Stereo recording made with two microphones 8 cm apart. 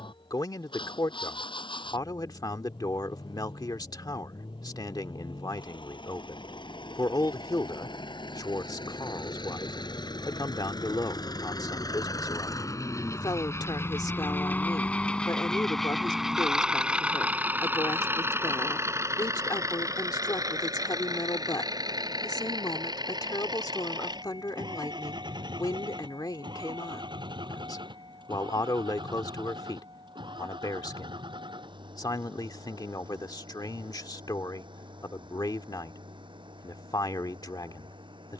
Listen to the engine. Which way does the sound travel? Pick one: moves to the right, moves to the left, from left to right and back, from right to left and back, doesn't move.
moves to the right.